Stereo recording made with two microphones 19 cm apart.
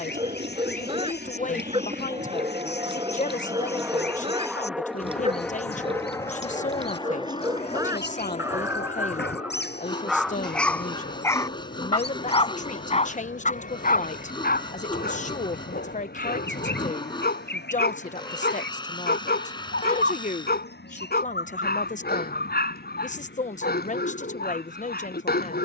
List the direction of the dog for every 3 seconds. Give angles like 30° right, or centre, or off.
30° right, 30° right, 20° right, centre, 40° left, 60° left, 60° left, 60° left, 60° left.